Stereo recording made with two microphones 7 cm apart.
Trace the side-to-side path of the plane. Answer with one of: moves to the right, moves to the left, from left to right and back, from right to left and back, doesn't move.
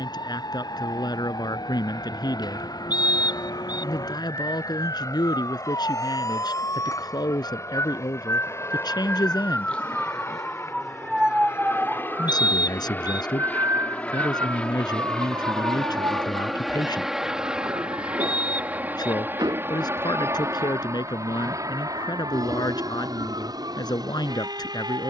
moves to the right.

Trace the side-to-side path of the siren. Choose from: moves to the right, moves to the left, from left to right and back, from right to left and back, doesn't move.
moves to the right.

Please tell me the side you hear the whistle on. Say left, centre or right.
left.